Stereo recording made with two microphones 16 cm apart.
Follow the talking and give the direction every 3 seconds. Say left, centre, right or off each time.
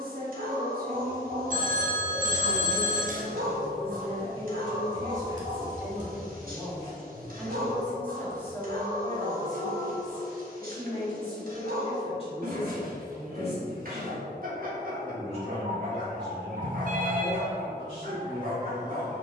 right, right, centre, left, left, left, left.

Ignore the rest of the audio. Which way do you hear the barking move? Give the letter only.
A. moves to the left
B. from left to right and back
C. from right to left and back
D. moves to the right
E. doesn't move
E.